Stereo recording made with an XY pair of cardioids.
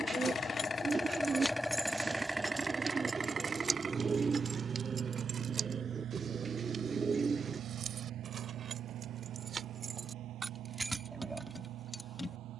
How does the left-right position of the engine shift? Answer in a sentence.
You can hear the engine go from the left side to the right.